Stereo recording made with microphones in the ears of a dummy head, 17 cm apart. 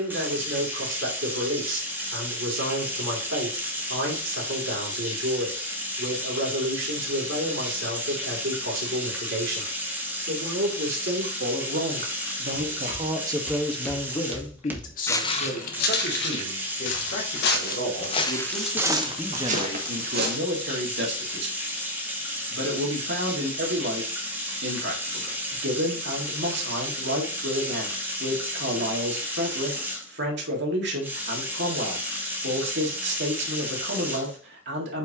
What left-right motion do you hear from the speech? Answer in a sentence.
In this clip you hear the speech move from right to left and back again.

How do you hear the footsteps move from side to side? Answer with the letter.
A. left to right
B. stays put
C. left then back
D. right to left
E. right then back
C.